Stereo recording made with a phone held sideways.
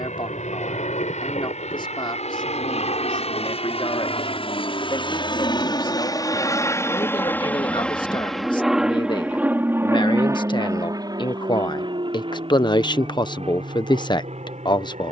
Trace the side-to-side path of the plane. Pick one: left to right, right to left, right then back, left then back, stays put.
left to right.